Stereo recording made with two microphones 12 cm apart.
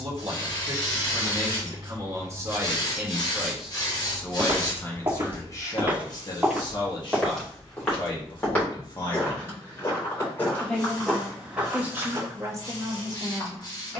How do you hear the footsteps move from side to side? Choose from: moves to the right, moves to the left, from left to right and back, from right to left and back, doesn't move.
from right to left and back.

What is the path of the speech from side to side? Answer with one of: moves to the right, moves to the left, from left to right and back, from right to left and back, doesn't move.
from right to left and back.